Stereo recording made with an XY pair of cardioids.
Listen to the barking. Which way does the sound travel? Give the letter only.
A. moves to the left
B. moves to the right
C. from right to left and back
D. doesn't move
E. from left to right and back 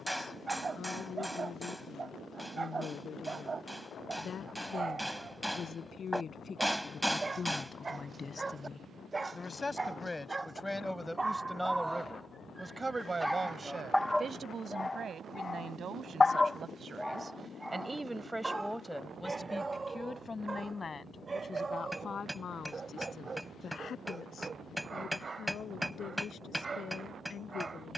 C.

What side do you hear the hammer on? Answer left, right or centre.
centre.